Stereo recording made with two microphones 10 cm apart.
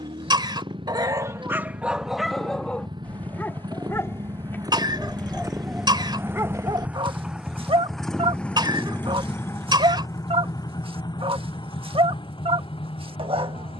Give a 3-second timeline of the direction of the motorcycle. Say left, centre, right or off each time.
right, right, centre, left, left.